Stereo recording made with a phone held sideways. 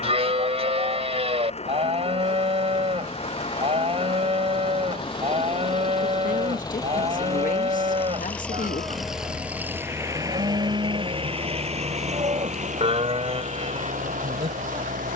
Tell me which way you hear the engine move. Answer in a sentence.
In this clip you hear the engine travel towards the right.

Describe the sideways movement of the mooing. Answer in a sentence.
In this clip you hear the mooing stay in one place.